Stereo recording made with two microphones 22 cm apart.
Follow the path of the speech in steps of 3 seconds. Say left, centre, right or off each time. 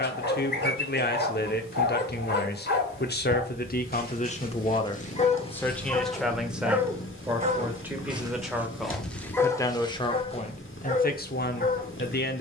left, left, centre, left.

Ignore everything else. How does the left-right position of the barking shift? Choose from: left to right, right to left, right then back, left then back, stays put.
right then back.